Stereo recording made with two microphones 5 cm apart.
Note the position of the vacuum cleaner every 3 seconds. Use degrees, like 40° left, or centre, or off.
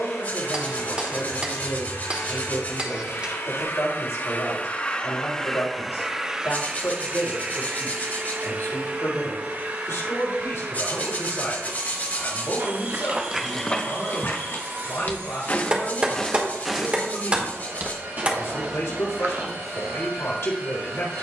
80° left, 30° left, 30° right, 60° right, 60° right, 70° right, 70° right.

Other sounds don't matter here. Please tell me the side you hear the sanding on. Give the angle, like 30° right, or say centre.
40° left.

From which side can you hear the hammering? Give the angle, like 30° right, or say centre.
30° right.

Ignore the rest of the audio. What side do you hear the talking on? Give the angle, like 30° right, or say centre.
80° left.